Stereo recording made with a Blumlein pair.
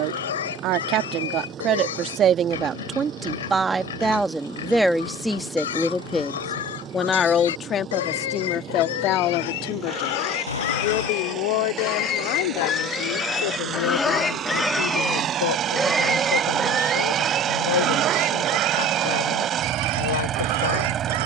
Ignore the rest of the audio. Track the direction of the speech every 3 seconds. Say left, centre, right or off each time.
right, centre, left, left, left, left, left.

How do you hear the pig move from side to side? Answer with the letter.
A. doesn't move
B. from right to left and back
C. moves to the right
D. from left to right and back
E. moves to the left
C.